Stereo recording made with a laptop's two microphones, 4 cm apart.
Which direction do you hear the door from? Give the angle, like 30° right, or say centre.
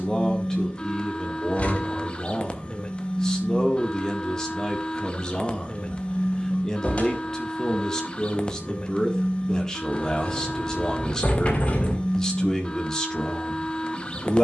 30° left.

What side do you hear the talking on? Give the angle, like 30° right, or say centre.
10° left.